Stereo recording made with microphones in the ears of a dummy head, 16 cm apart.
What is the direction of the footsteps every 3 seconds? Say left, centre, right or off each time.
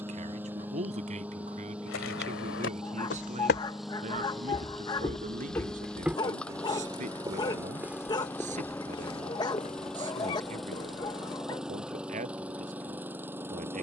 left, left, centre, left, off.